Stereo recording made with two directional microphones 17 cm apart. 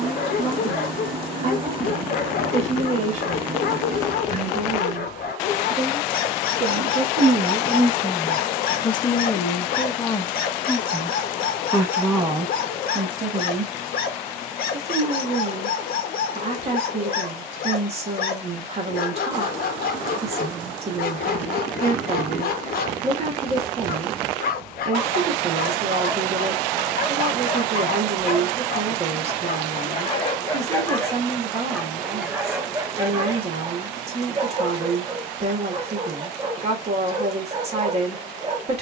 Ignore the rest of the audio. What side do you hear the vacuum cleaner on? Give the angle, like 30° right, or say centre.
30° right.